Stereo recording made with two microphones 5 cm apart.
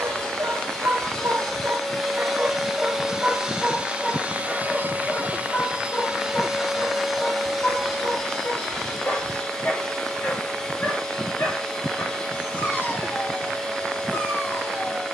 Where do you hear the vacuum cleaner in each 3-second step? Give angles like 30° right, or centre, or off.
10° left, 20° right, centre, 10° left, 10° left.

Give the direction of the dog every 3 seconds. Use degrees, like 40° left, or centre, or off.
50° right, 10° left, 30° left, 40° left, 50° left.